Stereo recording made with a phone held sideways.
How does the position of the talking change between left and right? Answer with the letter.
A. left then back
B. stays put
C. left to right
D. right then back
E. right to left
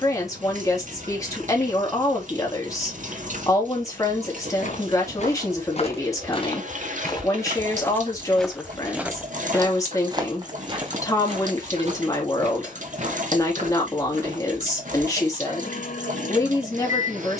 B.